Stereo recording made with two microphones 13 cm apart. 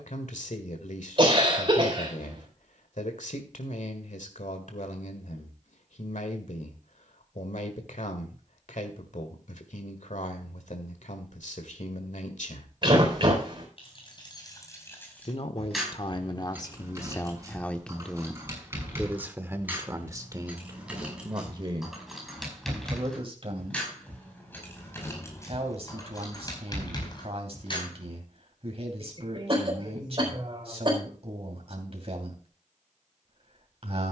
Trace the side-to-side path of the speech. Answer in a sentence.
In this clip you hear the speech move to the right.